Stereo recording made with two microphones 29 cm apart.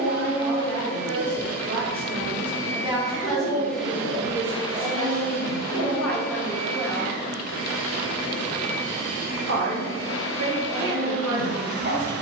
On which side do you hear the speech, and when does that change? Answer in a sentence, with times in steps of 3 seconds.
In this clip you hear the speech on the right from 0 s, in the centre from 3 s and on the right from 9 s.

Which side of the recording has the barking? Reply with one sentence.
You can hear the barking on the right.